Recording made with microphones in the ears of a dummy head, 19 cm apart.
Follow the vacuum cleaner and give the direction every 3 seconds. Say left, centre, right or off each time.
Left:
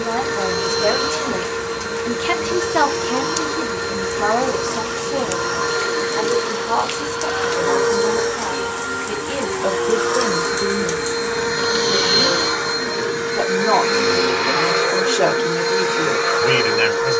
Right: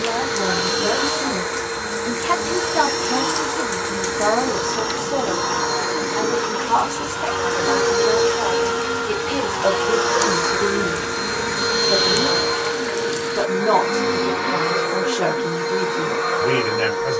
right, right, right, right, left, left.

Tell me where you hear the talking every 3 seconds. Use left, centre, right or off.
left, centre, right, right, centre, left.